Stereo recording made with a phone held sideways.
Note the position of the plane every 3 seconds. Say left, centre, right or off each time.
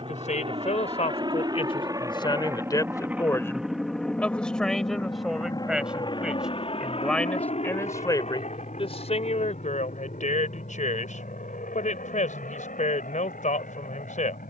right, centre, left, left, left.